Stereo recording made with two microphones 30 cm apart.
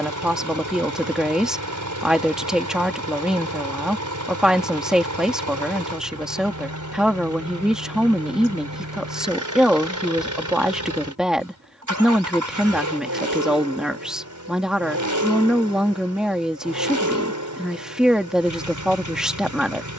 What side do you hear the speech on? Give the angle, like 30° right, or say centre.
centre.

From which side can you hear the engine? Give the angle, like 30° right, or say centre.
80° right.